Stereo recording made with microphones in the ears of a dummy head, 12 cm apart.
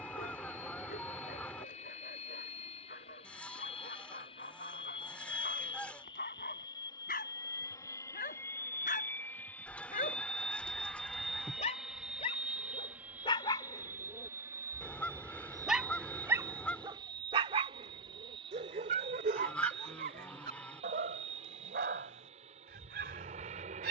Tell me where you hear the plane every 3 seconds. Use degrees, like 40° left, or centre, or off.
50° left, 40° left, 20° left, centre, 10° right, 30° right, 40° right, 50° right.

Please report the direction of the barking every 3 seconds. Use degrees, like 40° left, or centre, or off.
70° left, 70° left, 60° left, 50° left, 30° left, 20° right, 60° right, 80° right.